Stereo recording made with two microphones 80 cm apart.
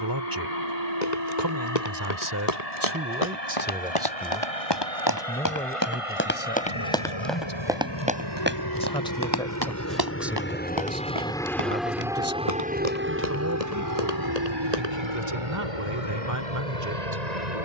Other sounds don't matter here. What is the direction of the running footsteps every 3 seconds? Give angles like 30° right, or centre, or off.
50° left, 30° left, centre, 30° right, 50° right, off.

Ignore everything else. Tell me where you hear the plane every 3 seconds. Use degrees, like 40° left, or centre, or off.
60° left, 50° left, 40° left, 10° left, 20° right, 40° right.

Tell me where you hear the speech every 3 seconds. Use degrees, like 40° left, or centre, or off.
20° right, centre, 10° left, centre, 20° right, 20° right.